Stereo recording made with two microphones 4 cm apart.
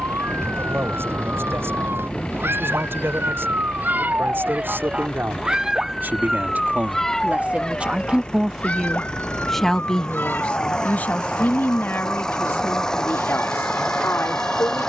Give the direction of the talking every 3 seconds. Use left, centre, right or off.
right, right, right, left, left.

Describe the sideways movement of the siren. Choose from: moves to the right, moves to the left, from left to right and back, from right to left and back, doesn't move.
moves to the left.